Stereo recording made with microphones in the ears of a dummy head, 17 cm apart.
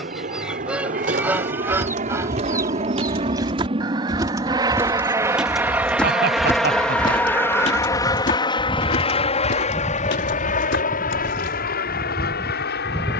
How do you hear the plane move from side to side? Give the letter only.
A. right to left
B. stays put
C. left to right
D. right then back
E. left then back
A.